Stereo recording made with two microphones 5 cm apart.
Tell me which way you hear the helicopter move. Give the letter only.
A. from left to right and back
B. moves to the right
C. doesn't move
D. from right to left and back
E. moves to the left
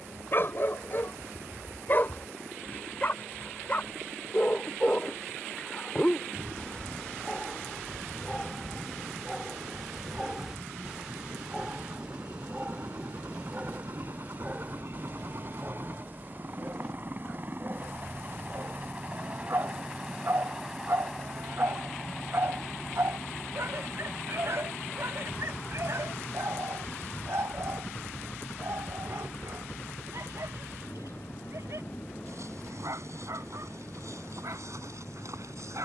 E.